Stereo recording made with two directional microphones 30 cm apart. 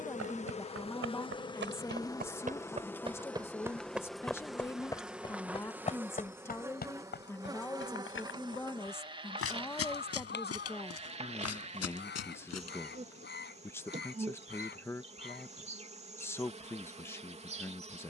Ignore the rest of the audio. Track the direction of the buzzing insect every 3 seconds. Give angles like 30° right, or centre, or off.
20° left, centre, 10° right, 20° right, 20° right, 20° right.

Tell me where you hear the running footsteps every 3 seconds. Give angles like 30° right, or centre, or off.
40° right, centre, 40° left, 50° left, 60° left, off.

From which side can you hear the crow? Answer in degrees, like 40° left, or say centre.
30° left.